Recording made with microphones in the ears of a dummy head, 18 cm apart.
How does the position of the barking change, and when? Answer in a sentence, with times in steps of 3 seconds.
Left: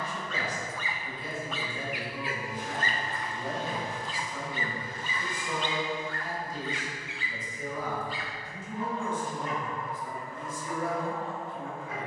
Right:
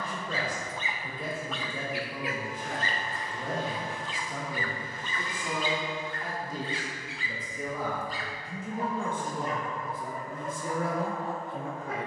You can hear the barking in the centre from 0 s, on the left from 3 s and on the right from 6 s.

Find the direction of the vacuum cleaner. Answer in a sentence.
In this clip you hear the vacuum cleaner on the left.